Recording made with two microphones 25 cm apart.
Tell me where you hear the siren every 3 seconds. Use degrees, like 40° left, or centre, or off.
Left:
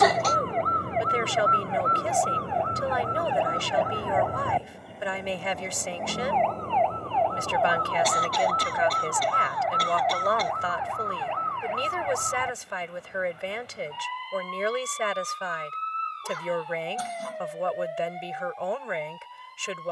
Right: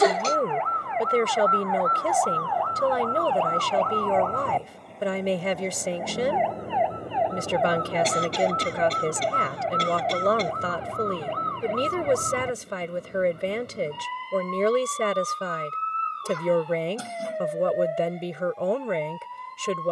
30° left, 10° left, 20° right, 30° right, 40° right, 50° right, 60° right.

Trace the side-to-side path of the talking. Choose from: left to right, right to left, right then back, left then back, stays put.
stays put.